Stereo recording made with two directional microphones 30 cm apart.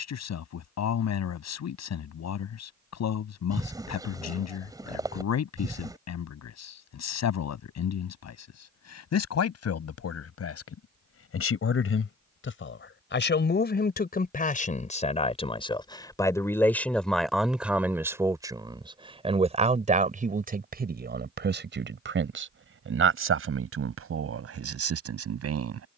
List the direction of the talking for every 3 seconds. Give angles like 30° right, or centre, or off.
60° left, 60° left, 60° left, 50° left, 30° left, 10° left, 20° right, 40° right, 50° right.